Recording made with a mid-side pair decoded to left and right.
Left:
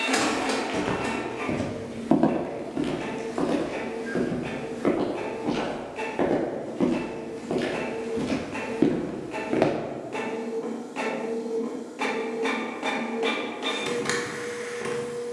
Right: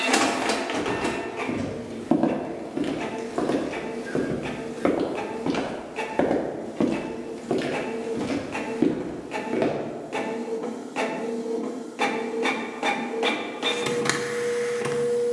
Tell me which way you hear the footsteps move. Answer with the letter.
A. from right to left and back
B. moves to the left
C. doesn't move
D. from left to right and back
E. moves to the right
D.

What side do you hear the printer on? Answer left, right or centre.
right.